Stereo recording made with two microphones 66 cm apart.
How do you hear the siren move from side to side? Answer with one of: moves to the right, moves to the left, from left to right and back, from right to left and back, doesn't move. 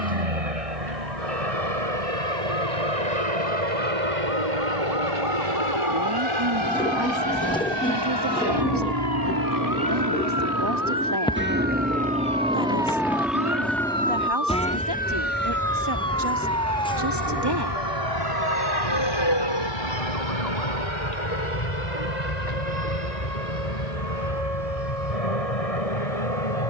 moves to the left.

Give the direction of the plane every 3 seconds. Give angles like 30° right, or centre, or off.
70° right, 60° right, 40° right, 20° right, centre, 20° left, 40° left, 50° left, 50° left.